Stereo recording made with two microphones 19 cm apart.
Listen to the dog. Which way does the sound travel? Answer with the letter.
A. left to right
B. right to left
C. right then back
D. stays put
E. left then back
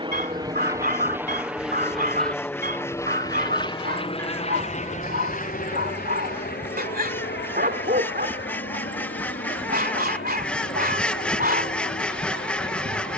D.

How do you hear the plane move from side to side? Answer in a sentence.
In this clip you hear the plane travel towards the left.